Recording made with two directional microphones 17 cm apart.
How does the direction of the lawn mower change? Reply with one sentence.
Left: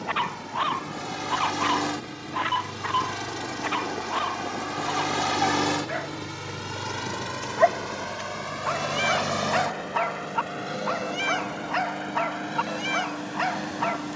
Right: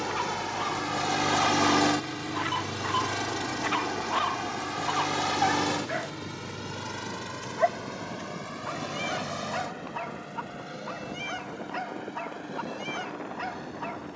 You can hear the lawn mower move to the left.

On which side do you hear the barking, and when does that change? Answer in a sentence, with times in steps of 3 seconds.
You can hear the barking on the left from 0 s, in the centre from 3 s and on the left from 6 s.